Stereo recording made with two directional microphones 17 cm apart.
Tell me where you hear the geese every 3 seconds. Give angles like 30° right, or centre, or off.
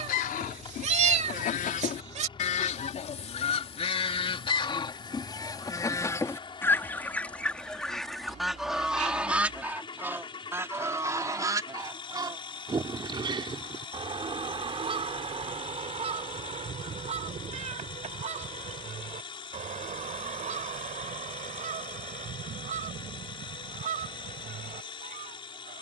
50° left, 30° left, 10° left, 10° right, 30° right, 40° right, 40° right, 50° right, 50° right.